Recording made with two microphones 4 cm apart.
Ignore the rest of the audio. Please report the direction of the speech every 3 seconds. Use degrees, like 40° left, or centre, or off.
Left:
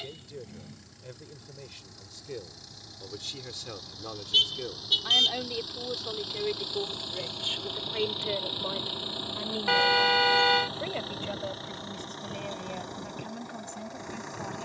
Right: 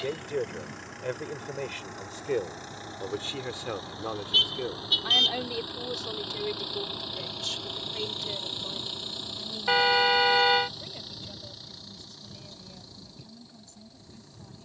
50° right, 20° right, 20° left, 50° left, 60° left.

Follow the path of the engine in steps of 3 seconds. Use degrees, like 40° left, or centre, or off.
50° right, 30° right, centre, 30° left, 50° left.